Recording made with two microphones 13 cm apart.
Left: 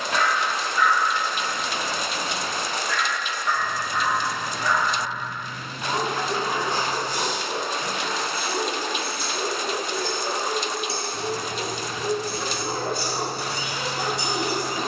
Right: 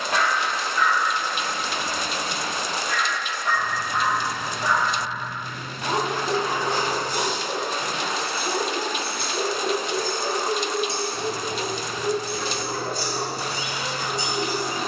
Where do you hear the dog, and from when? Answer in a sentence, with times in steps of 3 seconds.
You can hear the dog on the right from 0 s and on the left from 12 s.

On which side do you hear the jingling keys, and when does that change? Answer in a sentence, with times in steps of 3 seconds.
In this clip you hear the jingling keys not at all from 0 s, on the right from 6 s and on the left from 12 s.